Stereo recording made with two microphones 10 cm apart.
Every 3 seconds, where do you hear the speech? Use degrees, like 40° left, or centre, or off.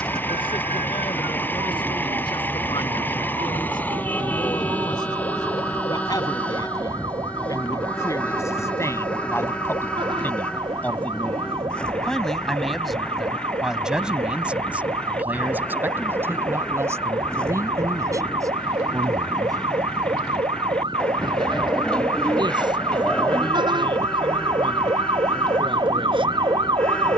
60° left, 50° left, 40° left, 20° left, centre, 30° right, 40° right, 50° right, 60° right.